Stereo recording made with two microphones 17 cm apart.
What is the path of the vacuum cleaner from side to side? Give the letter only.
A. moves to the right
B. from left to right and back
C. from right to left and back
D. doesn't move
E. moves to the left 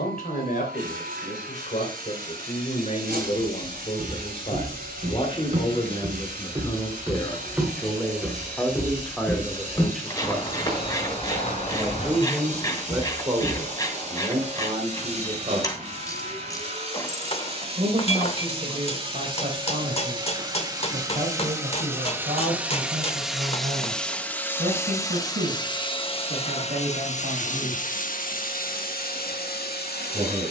E.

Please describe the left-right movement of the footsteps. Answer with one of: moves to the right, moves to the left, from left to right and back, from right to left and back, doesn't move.
moves to the left.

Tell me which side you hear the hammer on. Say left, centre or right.
left.